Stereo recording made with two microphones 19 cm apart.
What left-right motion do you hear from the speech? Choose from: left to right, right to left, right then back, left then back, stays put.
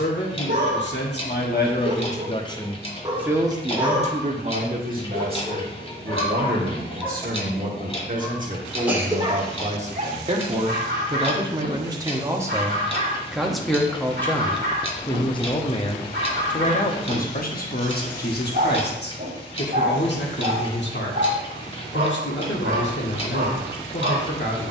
right then back.